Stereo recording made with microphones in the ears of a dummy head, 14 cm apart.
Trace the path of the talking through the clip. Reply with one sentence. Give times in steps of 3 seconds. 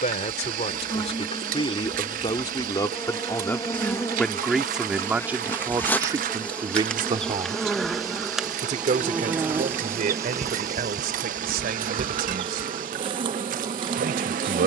You can hear the talking on the left from 0 s, in the centre from 3 s and on the right from 6 s.